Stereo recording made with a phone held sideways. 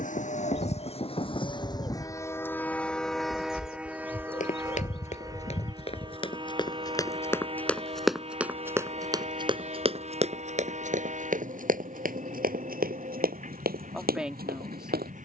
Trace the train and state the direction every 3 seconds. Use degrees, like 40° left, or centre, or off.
30° left, 10° right, 40° right, 40° right, 50° right.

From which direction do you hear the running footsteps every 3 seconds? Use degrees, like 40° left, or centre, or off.
off, 50° left, 10° left, 40° right, 70° right.